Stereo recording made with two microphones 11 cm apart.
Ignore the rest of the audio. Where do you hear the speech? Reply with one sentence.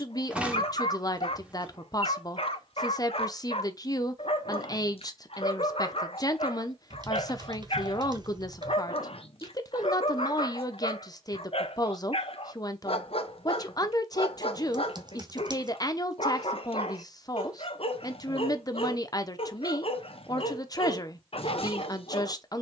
You can hear the speech on the left.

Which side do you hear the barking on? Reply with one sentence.
You can hear the barking on the left.